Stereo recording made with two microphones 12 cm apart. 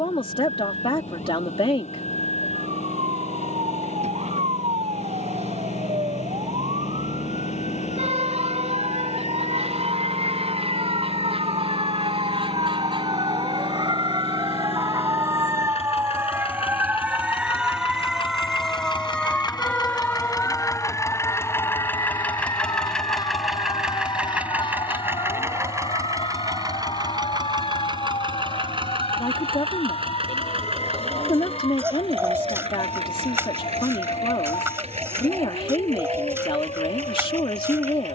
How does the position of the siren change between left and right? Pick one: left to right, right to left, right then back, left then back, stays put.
right to left.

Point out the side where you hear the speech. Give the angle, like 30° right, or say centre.
50° left.